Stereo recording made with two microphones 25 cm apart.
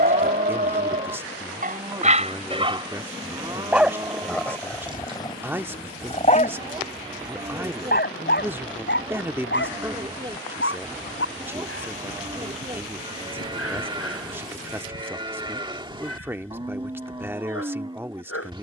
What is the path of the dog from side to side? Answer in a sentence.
In this clip you hear the dog move from right to left.